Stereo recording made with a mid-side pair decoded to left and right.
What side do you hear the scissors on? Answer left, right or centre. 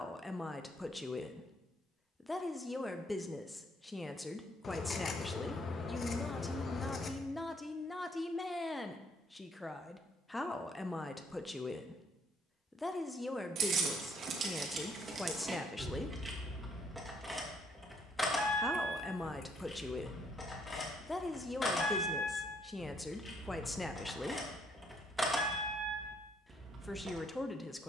left.